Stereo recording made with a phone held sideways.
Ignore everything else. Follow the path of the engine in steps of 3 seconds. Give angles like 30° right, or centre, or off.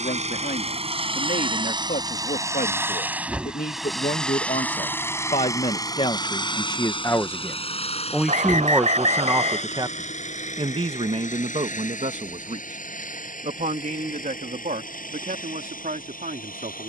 30° right, 10° left, 40° left, 50° left, 60° left, 60° left.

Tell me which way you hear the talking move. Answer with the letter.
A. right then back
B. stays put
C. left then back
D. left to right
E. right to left
D.